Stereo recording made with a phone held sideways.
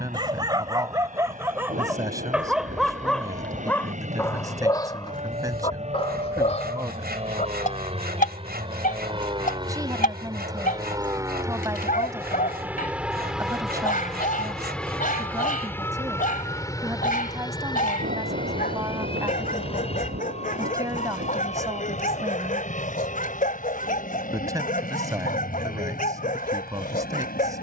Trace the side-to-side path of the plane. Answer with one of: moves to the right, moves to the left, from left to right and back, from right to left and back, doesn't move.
moves to the left.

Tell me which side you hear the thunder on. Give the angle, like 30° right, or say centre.
80° right.